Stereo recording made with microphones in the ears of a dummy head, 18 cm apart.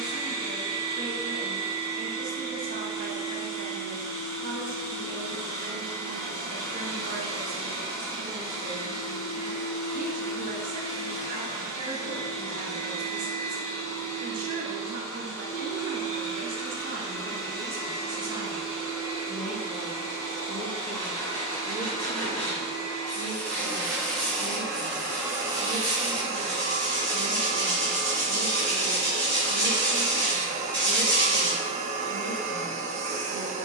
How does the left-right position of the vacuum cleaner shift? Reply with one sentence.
In this clip you hear the vacuum cleaner move from left to right.